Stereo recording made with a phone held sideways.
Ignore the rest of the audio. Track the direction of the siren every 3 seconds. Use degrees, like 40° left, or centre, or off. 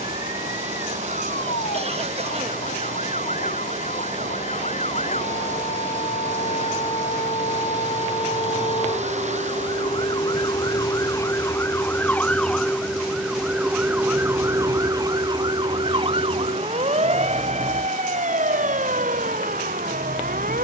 60° left, 50° left, 40° left, 30° left, 10° right, 40° right, 60° right.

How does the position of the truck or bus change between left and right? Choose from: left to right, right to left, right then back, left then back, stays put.
stays put.